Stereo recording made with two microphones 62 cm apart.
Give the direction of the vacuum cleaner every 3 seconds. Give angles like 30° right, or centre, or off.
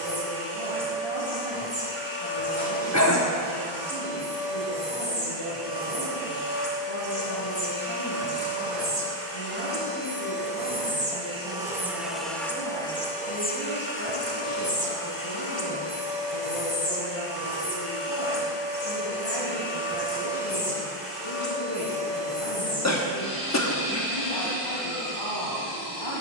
50° right, 50° right, 30° right, 20° right, 10° left, 40° left, 60° left, 80° left, 80° left.